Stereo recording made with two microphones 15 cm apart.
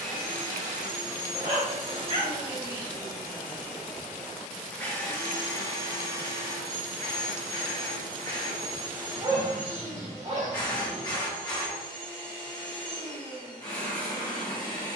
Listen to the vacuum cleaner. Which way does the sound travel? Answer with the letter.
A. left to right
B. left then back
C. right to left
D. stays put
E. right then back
C.